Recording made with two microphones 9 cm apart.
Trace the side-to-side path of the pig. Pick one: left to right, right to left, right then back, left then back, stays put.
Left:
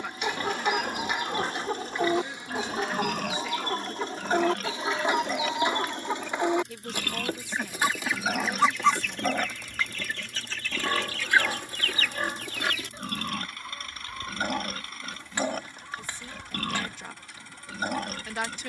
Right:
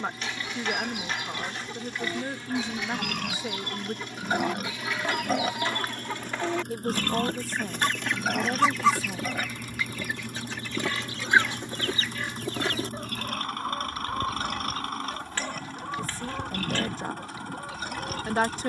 right then back.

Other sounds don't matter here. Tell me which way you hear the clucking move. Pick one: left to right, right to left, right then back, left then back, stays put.
left to right.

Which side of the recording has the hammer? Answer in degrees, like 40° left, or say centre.
20° left.